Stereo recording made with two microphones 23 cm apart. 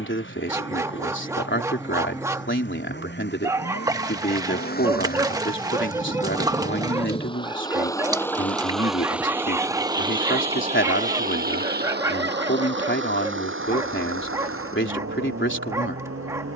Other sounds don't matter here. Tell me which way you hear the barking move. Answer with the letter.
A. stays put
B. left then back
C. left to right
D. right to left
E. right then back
A.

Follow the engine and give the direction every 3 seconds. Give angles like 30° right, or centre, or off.
60° left, 40° left, 20° left, 30° right, 60° right, 70° right.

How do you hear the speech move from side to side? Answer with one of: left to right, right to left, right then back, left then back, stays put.
stays put.